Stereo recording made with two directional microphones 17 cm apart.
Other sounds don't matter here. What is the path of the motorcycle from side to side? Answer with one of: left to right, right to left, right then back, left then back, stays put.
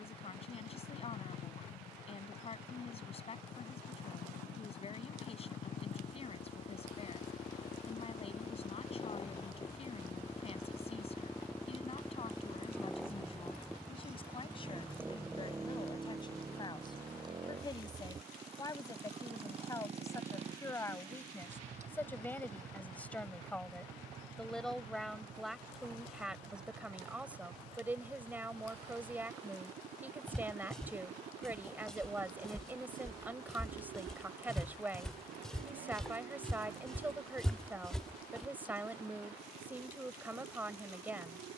left to right.